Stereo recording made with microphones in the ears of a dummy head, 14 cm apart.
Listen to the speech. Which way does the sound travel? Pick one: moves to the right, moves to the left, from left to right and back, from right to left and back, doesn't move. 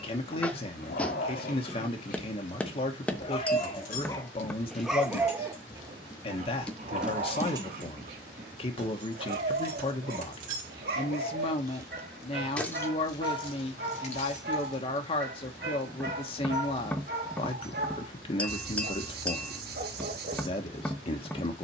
doesn't move.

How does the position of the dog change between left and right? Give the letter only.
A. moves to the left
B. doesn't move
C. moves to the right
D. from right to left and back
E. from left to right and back
C.